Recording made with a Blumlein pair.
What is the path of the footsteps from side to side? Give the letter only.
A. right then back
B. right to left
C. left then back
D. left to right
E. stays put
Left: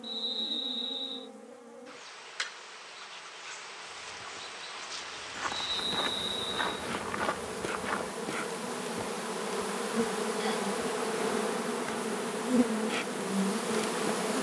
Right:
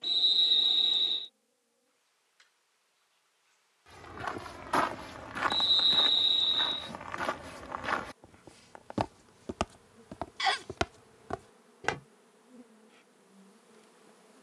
C.